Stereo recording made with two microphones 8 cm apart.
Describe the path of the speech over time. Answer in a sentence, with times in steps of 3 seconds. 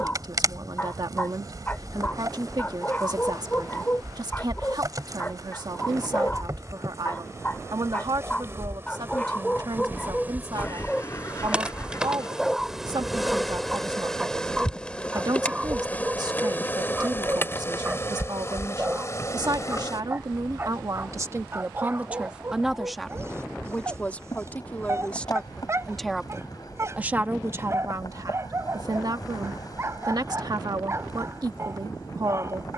In this clip you hear the speech on the right from 0 s, in the centre from 21 s and on the right from 27 s.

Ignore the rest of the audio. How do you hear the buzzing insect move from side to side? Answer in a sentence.
You can hear the buzzing insect move from right to left.